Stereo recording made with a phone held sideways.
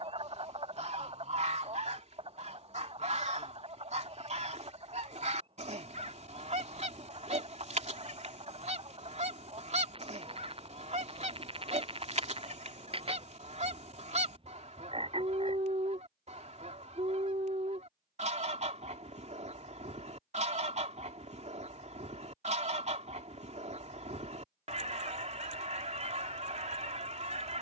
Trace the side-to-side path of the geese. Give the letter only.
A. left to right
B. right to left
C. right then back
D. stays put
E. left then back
D.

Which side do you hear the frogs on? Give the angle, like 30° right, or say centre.
30° right.